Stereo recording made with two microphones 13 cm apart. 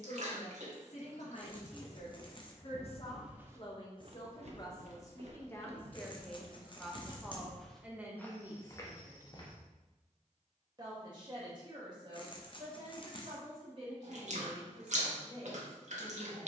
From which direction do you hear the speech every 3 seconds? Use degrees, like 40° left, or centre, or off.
60° left, 30° left, 10° right, 30° right, 40° right, 50° right.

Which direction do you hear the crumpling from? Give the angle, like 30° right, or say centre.
40° left.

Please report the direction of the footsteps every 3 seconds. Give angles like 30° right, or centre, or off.
30° left, 40° right, 10° right, 30° left, off, off.